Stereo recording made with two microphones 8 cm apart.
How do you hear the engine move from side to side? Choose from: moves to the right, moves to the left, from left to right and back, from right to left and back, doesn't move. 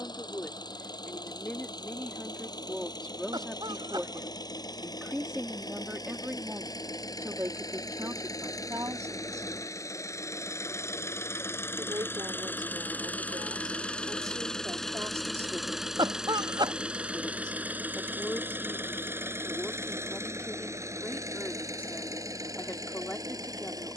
moves to the right.